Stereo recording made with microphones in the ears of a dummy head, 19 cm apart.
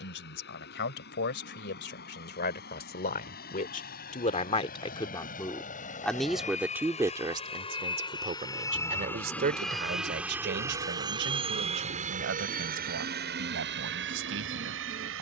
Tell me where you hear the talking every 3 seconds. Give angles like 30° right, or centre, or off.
60° left, 30° left, 20° right, 50° right, 70° right.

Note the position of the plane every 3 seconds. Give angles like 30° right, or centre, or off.
60° left, 50° left, 30° left, 10° right, 50° right.